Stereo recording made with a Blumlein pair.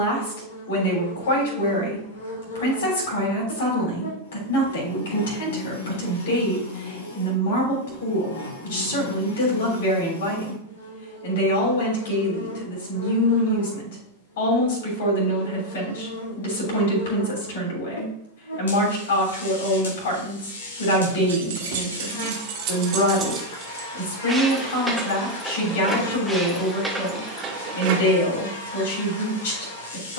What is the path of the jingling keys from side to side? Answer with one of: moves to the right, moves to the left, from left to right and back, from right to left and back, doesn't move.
from right to left and back.